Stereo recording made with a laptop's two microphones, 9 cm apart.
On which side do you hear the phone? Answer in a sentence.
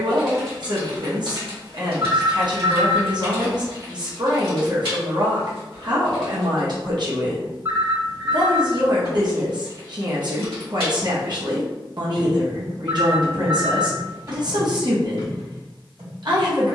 You can hear the phone on the right.